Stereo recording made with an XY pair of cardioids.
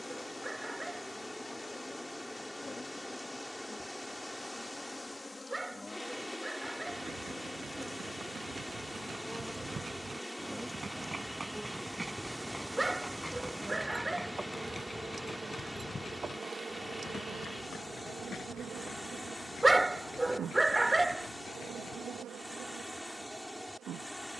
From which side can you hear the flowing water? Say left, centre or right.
centre.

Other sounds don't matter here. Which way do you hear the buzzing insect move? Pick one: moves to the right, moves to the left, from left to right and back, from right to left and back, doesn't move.
moves to the right.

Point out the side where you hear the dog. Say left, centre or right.
centre.